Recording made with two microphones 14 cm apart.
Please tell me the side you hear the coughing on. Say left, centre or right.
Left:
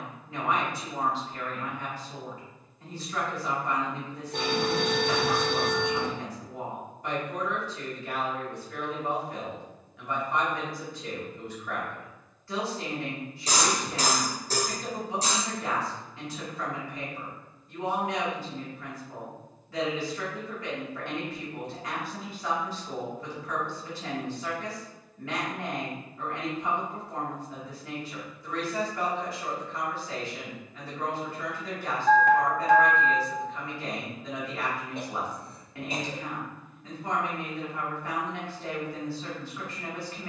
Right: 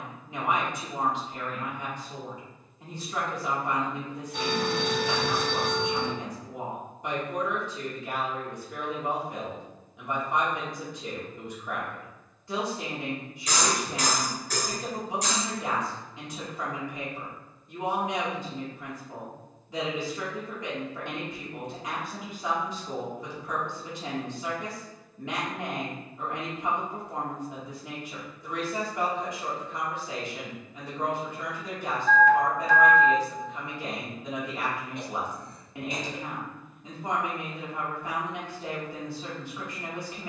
left.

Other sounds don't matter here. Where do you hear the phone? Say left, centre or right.
left.